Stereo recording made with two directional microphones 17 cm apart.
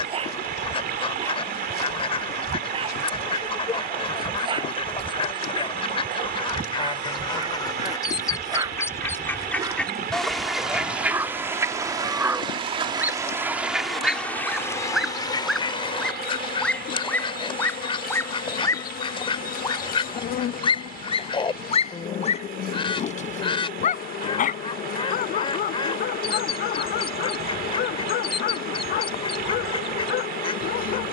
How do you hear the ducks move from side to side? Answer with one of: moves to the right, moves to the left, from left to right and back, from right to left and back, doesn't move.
from left to right and back.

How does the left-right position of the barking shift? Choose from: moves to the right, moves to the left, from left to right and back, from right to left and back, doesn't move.
moves to the left.